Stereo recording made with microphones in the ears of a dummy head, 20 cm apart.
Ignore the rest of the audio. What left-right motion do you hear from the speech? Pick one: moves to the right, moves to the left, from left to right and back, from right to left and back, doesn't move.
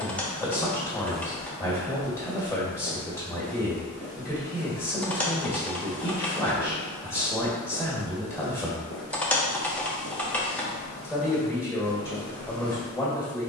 doesn't move.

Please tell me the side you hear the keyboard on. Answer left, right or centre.
centre.